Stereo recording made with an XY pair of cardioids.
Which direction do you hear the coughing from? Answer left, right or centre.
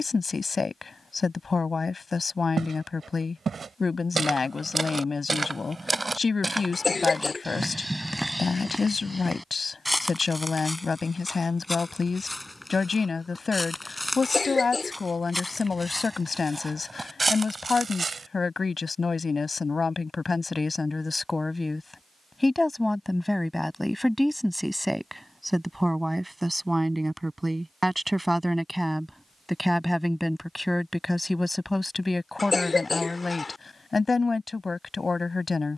left.